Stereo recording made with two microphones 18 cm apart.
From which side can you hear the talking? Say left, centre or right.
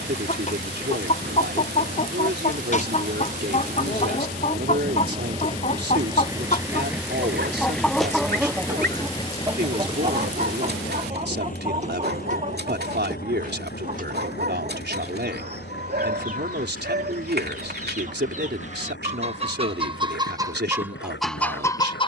right.